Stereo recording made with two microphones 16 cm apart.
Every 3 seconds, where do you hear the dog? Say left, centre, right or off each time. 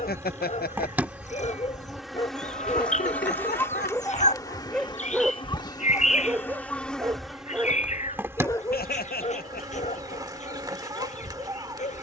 left, centre, centre, left.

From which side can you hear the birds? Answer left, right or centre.
left.